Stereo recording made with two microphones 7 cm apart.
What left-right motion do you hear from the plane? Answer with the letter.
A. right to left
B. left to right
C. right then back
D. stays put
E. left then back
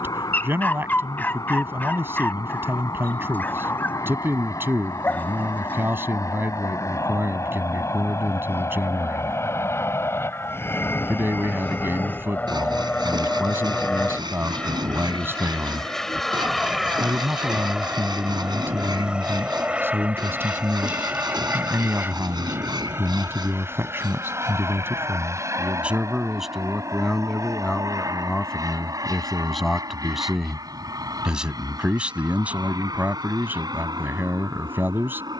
B.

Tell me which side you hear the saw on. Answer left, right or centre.
right.